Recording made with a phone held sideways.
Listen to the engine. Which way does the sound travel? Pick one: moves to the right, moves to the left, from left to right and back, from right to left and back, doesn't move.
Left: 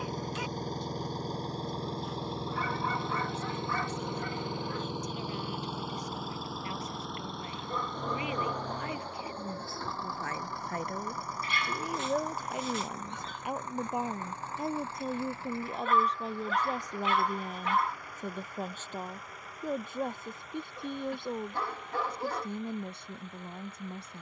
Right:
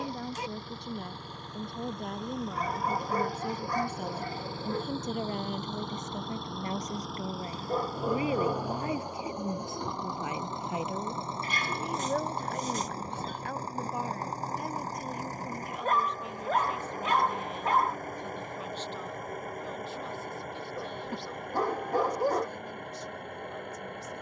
moves to the right.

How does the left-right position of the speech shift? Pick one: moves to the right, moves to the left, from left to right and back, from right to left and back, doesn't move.
moves to the left.